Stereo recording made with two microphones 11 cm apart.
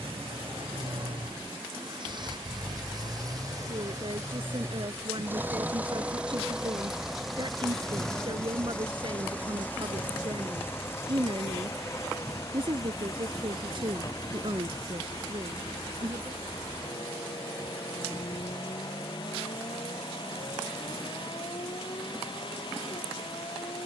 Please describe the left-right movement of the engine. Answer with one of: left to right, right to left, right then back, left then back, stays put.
right to left.